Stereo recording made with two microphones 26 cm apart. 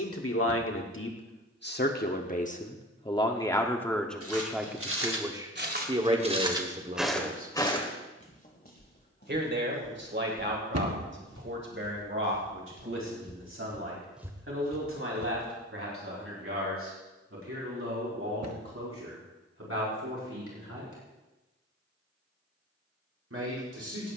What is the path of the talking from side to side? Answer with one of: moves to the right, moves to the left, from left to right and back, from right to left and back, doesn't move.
moves to the right.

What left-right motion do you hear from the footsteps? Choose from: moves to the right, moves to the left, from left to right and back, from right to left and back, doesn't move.
from right to left and back.